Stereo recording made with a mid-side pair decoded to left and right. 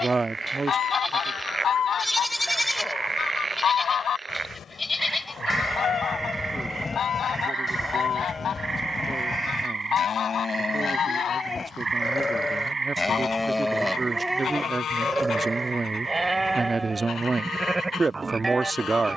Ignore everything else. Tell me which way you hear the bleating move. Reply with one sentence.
In this clip you hear the bleating move from right to left and back again.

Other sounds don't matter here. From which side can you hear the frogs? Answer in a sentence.
In this clip you hear the frogs on the right.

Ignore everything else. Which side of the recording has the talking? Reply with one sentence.
In this clip you hear the talking on the right.